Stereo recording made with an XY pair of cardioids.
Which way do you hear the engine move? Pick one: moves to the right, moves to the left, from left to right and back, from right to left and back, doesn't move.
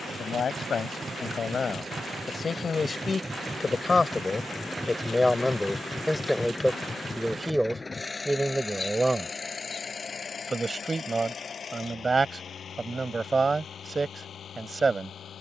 moves to the left.